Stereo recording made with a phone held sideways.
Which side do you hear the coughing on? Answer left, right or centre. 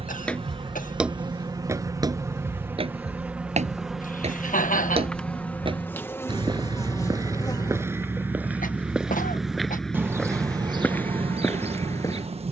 left.